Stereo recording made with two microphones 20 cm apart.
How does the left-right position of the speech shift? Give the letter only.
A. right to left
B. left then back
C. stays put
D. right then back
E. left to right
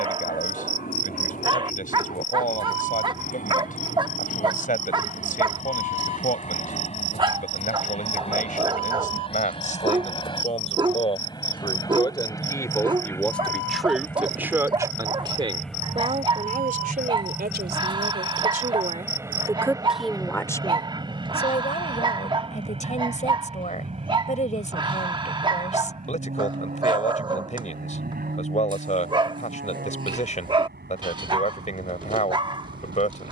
D.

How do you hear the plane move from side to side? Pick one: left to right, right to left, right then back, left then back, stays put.
left to right.